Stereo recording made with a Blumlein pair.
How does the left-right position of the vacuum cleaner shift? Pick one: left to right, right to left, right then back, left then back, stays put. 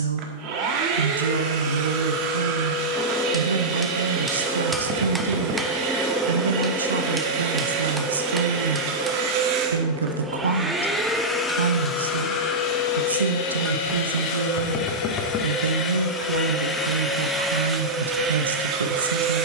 left then back.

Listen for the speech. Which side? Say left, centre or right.
right.